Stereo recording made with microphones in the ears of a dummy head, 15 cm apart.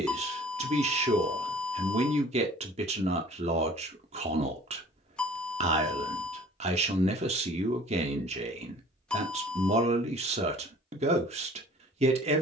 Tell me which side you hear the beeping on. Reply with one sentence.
You can hear the beeping in the centre.